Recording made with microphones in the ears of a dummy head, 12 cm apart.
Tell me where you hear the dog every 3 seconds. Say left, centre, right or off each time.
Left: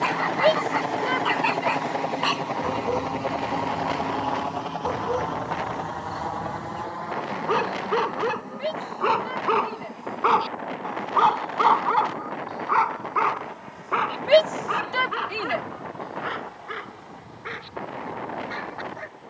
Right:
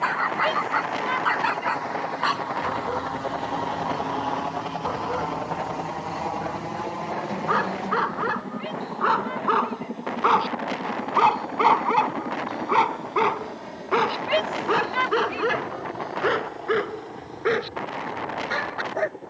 left, left, left, centre, right, right, right.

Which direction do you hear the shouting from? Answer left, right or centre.
left.